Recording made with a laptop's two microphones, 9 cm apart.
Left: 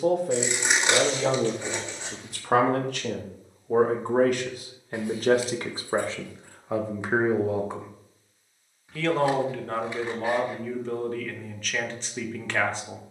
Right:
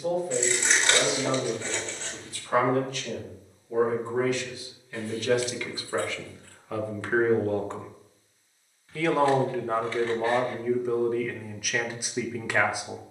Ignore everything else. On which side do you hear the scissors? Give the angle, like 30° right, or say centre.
20° left.